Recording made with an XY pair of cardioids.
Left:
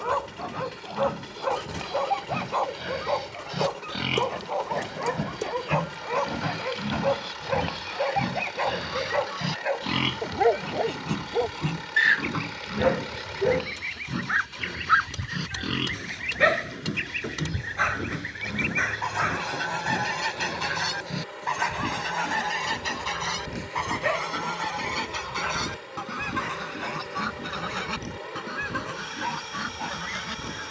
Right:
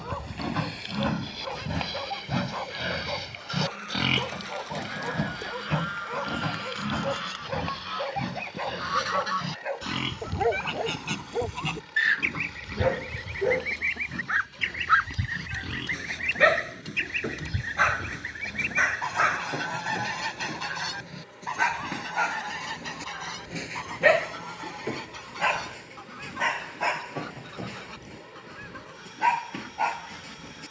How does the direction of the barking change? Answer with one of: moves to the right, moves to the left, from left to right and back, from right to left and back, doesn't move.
moves to the right.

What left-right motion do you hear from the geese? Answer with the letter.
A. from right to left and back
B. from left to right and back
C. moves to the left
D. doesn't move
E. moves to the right
C.